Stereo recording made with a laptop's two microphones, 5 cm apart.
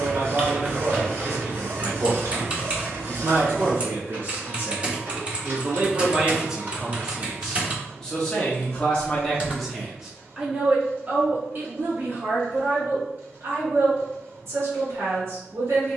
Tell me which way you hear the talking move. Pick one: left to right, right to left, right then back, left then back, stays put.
left then back.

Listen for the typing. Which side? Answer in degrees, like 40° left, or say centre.
30° right.